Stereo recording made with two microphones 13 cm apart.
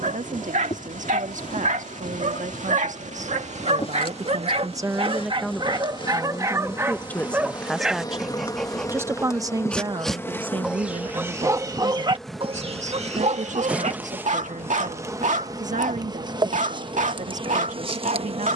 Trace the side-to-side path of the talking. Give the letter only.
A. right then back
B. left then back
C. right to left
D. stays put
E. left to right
B.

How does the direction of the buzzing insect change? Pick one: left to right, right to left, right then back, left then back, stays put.
left to right.